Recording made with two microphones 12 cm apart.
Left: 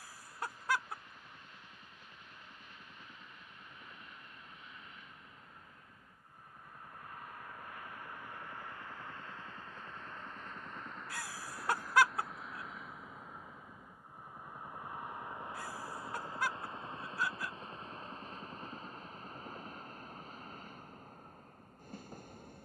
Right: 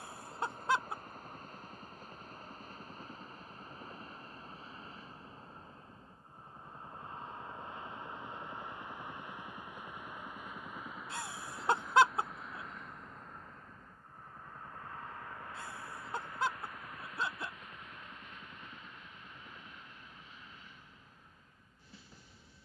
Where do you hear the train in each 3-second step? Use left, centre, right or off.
right, right, right, centre, centre, left, left, left.